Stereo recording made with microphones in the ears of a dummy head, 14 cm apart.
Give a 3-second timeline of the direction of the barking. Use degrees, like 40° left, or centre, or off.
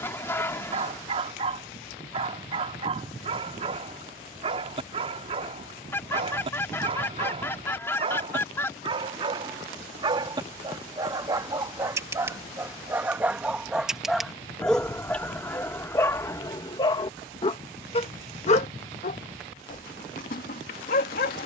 40° right, 40° right, 40° right, 30° right, 10° right, 20° left, 60° left.